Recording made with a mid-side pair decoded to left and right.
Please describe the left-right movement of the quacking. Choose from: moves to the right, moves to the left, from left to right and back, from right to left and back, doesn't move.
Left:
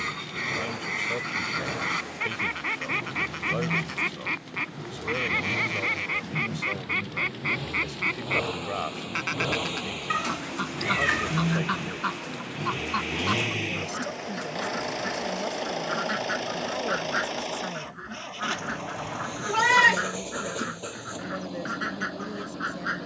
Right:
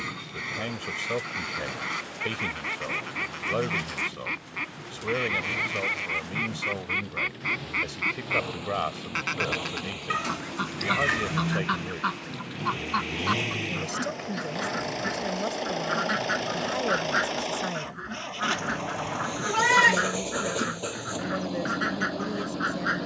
moves to the right.